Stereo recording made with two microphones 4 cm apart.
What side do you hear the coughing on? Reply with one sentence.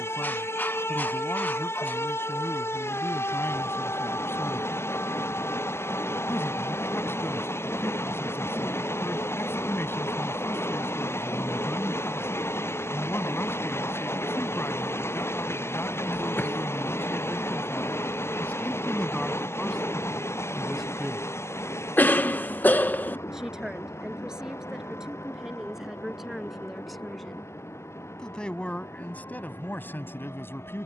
You can hear the coughing on the left.